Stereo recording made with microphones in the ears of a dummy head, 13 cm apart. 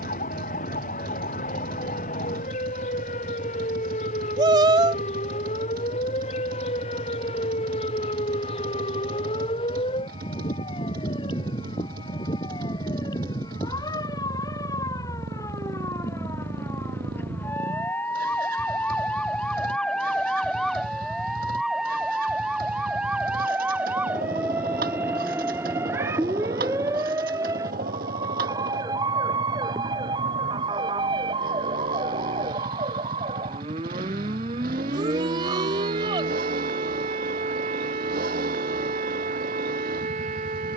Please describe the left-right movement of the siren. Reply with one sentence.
You can hear the siren move from left to right.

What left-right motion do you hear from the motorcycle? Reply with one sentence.
In this clip you hear the motorcycle stay in one place.